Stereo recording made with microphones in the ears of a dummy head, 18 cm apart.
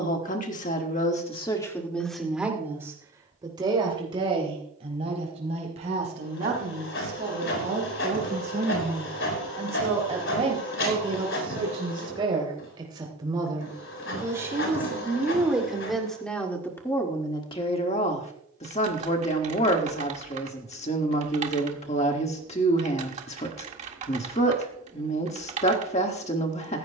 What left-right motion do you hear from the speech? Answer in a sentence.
You can hear the speech move from left to right and back again.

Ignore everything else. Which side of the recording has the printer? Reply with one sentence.
In this clip you hear the printer on the left.